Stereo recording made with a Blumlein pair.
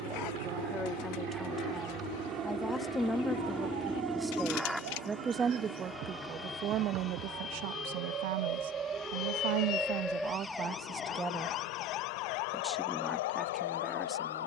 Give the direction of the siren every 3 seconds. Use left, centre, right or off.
right, right, right, centre, left.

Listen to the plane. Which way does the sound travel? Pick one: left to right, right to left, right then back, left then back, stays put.
right to left.